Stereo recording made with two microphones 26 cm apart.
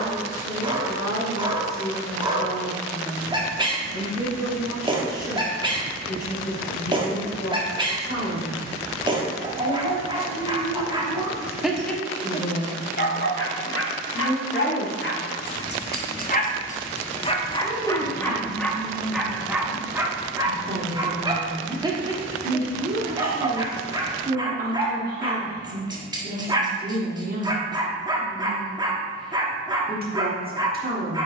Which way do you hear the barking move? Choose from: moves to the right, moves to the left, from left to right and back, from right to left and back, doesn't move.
from right to left and back.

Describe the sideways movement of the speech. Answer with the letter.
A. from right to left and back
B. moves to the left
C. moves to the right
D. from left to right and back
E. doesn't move
C.